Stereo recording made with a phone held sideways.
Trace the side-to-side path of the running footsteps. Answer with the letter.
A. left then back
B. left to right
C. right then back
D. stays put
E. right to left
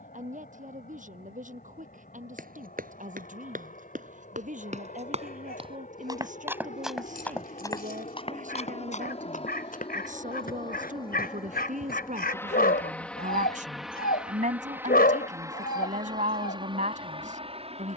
E.